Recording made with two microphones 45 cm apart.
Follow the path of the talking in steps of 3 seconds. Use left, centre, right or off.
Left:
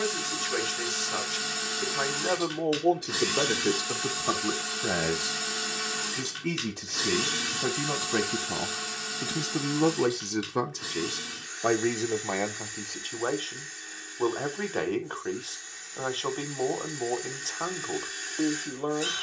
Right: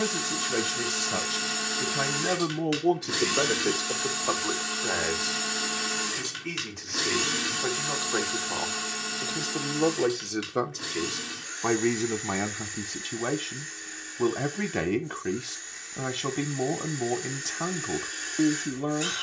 right, left, left, centre, right, right, right.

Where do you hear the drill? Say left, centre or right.
right.